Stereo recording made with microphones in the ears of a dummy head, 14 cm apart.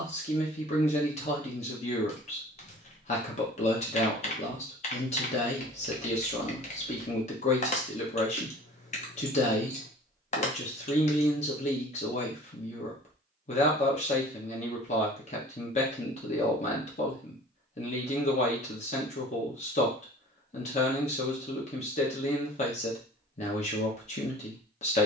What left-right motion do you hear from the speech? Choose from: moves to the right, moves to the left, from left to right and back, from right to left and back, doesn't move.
doesn't move.